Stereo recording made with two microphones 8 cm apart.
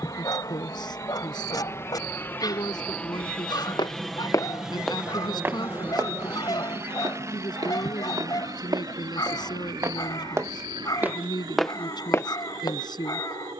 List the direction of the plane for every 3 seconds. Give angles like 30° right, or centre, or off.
30° left, 10° right, 40° right, 60° right, 60° right.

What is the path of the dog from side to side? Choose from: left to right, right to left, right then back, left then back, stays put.
stays put.